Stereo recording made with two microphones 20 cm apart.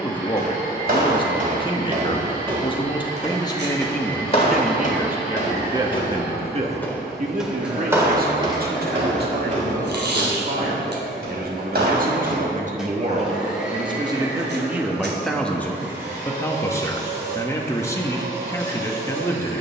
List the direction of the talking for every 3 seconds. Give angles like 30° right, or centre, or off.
30° left, centre, 40° right, 50° right, 30° right, 10° left, 10° left.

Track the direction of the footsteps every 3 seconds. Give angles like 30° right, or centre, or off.
40° right, 30° left, 10° right, 50° right, 60° right, off, off.